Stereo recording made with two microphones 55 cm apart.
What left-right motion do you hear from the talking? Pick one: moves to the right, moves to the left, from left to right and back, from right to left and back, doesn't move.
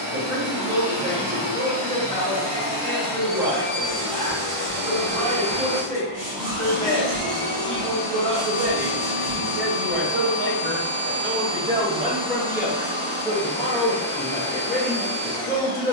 moves to the left.